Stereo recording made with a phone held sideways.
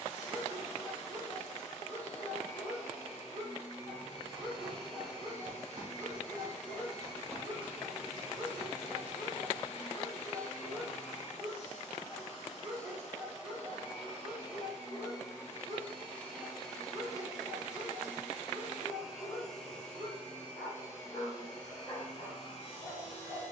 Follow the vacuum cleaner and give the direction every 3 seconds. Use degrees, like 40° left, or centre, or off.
50° left, 50° left, 50° left, 50° left, 40° left, 10° left, centre, 40° left.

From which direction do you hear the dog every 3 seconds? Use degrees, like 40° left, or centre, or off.
30° left, 30° left, 20° left, centre, centre, 20° left, 20° left, 20° left.